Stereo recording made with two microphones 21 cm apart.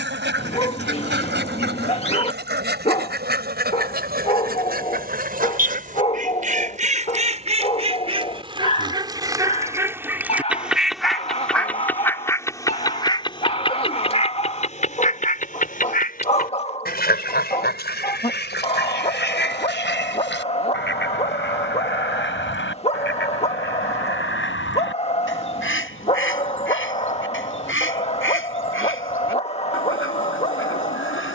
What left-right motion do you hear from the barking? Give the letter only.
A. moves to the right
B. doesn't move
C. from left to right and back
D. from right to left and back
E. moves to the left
B.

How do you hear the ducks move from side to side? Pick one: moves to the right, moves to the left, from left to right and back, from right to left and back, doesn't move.
moves to the left.